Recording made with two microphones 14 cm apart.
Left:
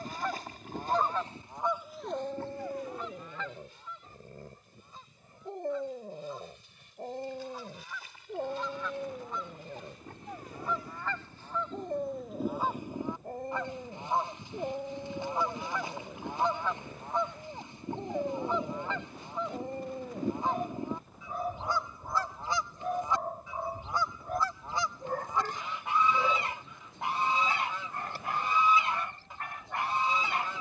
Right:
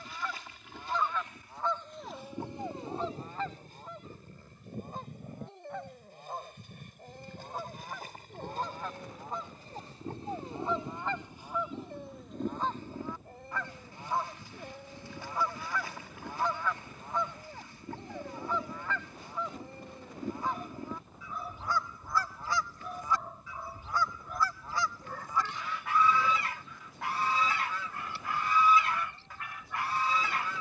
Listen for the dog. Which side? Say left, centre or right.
left.